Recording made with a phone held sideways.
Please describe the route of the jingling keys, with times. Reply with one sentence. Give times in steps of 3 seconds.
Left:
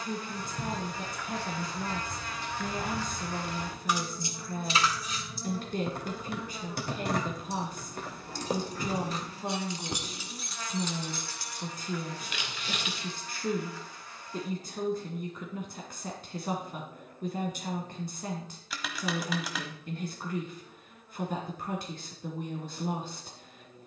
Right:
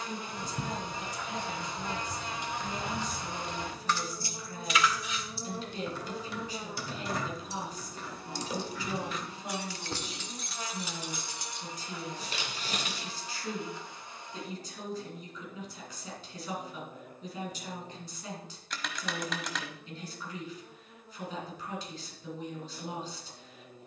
In this clip you hear the jingling keys on the right from 0 s, on the left from 3 s, in the centre from 9 s, on the right from 12 s and not at all from 15 s.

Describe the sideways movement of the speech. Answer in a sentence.
In this clip you hear the speech stay put.